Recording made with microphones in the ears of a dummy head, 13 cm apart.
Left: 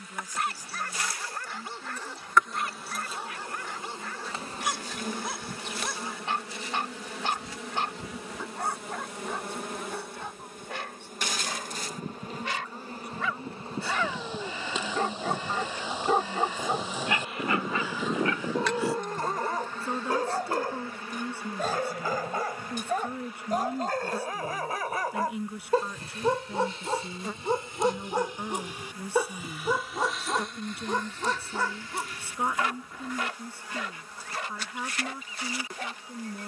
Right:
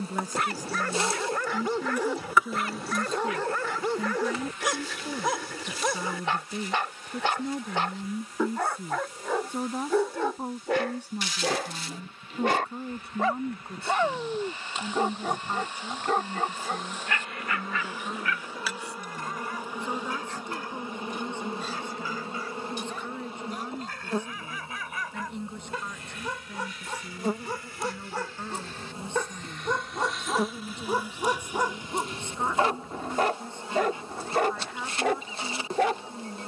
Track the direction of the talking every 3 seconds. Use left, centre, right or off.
right, right, right, right, right, centre, centre, centre, centre, centre, centre, centre.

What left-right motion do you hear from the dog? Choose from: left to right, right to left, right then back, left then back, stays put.
left then back.